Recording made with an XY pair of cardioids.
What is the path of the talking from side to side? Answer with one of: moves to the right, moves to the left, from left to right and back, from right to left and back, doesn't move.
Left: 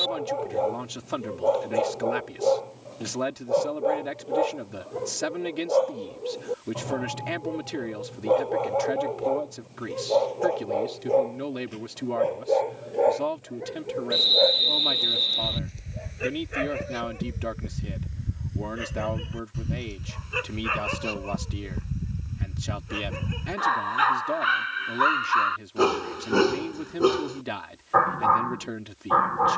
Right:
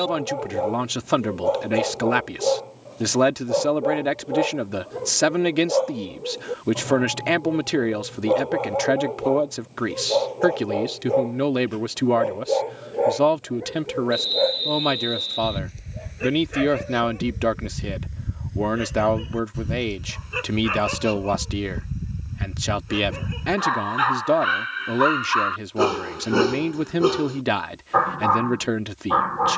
doesn't move.